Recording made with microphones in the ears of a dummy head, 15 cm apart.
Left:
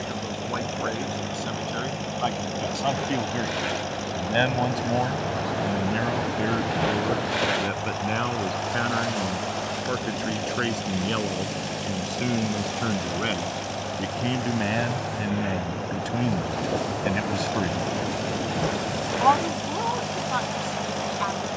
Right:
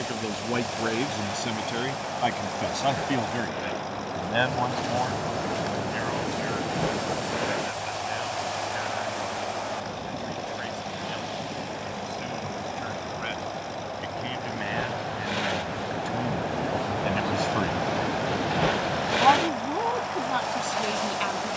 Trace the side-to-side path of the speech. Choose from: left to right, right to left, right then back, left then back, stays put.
left then back.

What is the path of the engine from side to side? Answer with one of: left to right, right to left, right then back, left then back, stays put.
stays put.